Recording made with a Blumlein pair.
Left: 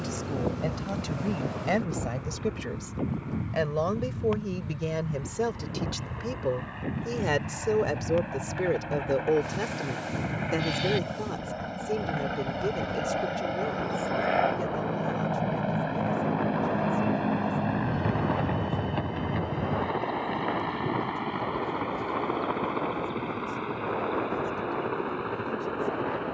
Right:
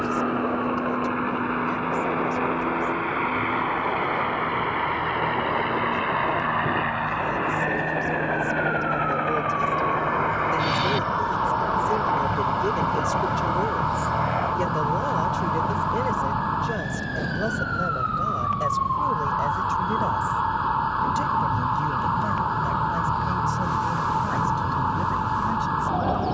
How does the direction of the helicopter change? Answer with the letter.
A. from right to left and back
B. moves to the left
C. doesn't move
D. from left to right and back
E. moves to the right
B.